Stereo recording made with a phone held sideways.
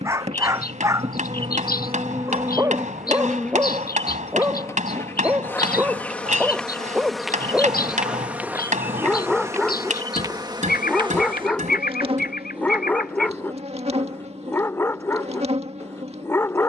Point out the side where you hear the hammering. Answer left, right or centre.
right.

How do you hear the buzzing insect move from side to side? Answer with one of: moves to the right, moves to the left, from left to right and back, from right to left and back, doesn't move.
from right to left and back.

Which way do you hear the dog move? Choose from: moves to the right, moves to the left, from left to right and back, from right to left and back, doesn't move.
moves to the left.